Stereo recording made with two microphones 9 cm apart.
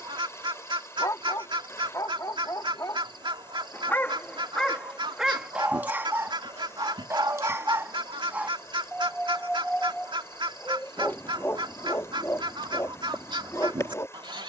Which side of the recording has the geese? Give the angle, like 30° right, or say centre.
70° right.